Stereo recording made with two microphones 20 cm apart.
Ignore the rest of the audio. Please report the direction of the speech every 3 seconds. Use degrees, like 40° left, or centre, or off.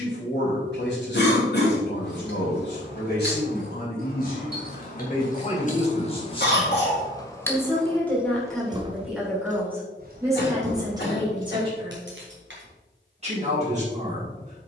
60° left, 50° left, 10° left, 20° right, 30° right.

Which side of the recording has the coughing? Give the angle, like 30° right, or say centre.
60° left.